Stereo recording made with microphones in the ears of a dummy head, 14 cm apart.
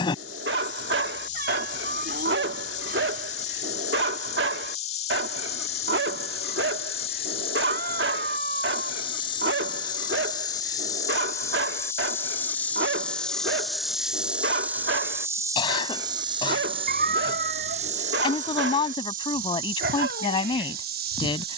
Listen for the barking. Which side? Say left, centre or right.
right.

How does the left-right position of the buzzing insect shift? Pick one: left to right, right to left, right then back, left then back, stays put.
left to right.